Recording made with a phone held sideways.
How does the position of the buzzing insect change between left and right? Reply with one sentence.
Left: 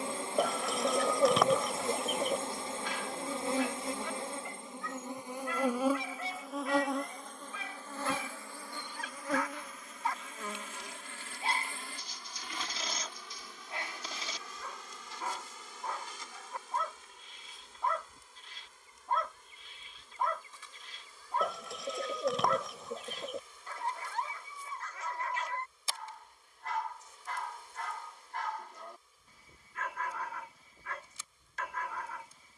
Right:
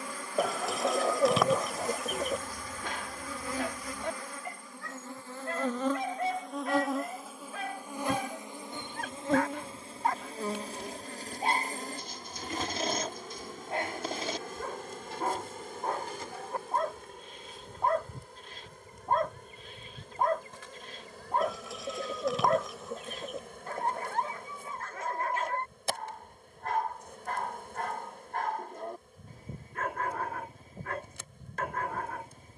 In this clip you hear the buzzing insect travel towards the right.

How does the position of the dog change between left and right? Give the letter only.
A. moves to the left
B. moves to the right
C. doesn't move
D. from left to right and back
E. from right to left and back
C.